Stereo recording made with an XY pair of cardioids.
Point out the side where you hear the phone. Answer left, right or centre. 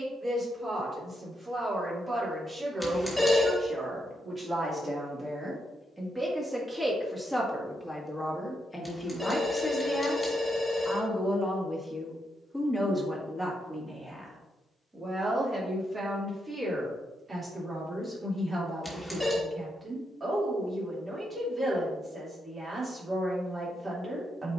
centre.